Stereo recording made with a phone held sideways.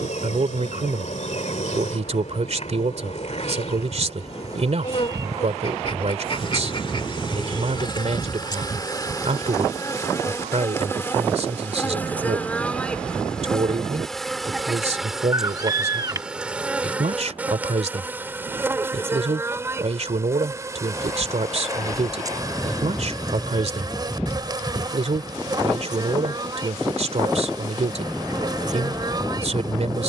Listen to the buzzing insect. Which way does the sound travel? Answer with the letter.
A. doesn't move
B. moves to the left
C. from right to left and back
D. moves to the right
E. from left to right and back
D.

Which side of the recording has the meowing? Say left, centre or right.
right.